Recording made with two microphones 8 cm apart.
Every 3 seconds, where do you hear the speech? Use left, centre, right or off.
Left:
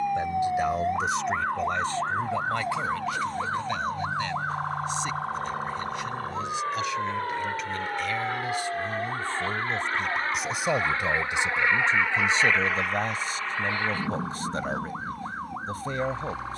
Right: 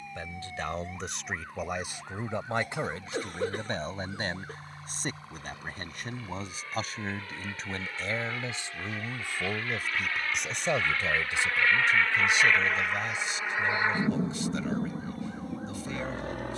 centre, right, right, centre, left, left.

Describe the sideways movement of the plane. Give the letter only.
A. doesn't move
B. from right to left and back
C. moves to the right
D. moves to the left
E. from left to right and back
C.